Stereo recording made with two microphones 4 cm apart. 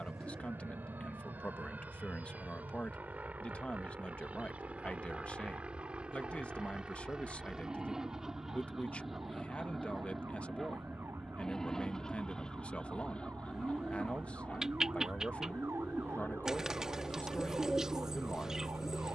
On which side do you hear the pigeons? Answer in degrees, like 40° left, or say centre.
10° right.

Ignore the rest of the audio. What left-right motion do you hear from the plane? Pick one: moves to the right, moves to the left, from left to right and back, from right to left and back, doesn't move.
moves to the left.